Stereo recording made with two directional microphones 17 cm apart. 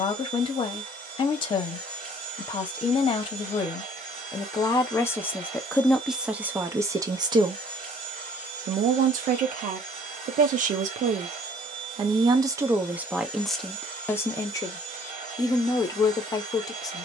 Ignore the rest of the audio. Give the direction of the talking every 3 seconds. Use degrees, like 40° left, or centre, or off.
30° left, 20° left, 30° right, 50° right, centre, 20° left.